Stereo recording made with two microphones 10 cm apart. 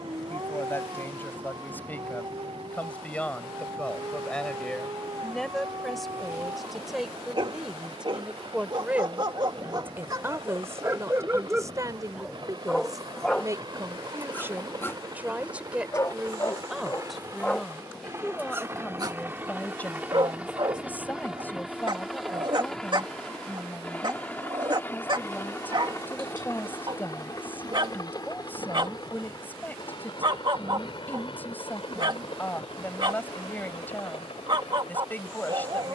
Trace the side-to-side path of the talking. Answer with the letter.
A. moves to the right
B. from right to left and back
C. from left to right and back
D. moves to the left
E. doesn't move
C.